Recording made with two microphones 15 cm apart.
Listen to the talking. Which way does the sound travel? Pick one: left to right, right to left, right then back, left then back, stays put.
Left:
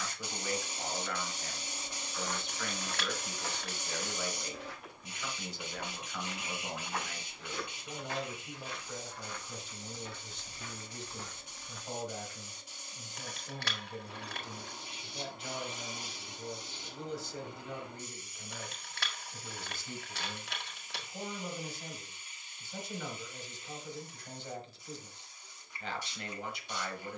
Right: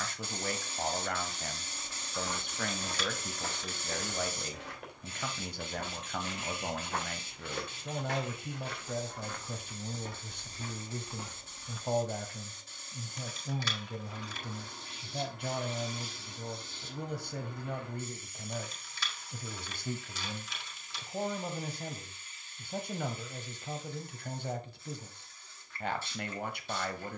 stays put.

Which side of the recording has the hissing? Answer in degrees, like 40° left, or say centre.
10° left.